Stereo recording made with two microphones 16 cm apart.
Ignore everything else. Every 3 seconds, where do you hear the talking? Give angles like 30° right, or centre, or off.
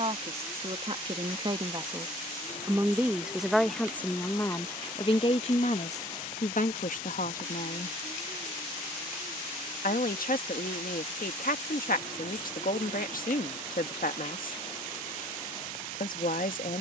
30° right, 20° left, 60° left, 70° left, 70° left, 70° left.